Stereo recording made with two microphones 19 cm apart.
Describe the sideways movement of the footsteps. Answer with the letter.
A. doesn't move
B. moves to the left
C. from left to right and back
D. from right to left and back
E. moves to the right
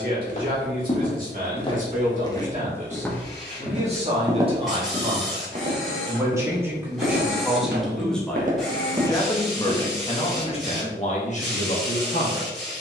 C.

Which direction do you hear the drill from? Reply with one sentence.
You can hear the drill in the centre.